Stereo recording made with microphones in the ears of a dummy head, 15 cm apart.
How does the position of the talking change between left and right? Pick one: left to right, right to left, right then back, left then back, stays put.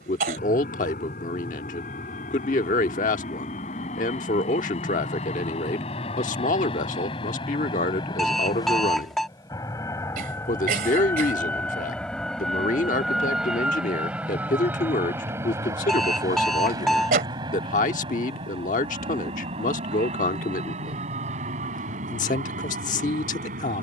stays put.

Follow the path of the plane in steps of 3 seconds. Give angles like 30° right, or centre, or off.
50° left, 50° left, 30° left, 20° left, centre, 20° right, 30° right, 40° right.